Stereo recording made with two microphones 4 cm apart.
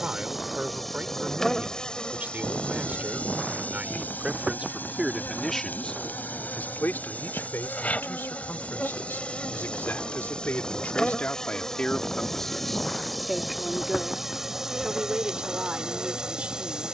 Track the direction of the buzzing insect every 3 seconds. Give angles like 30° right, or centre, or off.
10° left, 50° left, 40° left, 20° left, centre, 20° right.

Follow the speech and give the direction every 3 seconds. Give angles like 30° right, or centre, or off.
40° right, 10° right, 70° left, 50° left, centre, 30° right.